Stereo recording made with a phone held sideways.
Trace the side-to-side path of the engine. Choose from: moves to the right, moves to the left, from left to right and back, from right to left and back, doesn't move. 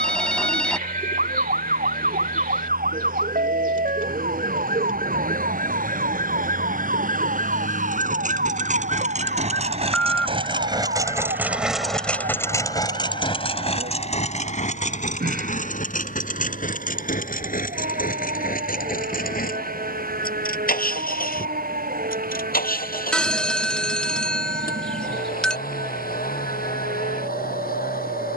moves to the left.